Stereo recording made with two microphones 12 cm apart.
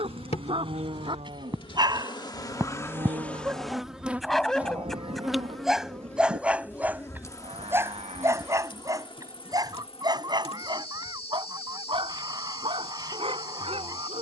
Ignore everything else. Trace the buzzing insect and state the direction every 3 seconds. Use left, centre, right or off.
left, centre, left, left, left.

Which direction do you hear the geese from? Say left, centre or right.
right.